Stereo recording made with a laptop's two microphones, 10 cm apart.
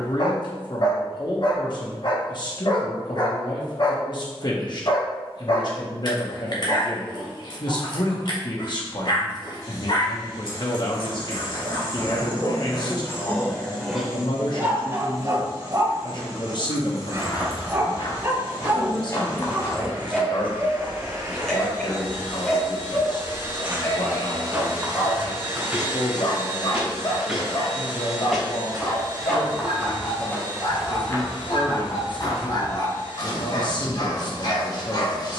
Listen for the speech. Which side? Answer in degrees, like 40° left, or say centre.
50° left.